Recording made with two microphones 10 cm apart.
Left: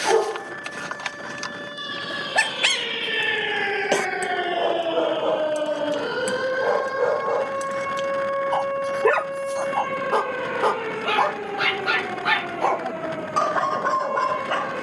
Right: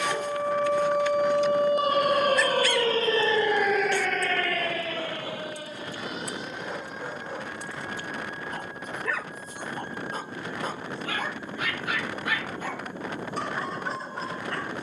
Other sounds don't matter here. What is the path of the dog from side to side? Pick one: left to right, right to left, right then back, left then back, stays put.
stays put.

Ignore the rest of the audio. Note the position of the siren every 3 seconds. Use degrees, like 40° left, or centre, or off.
60° right, 20° left, 70° left, 80° left, 80° left.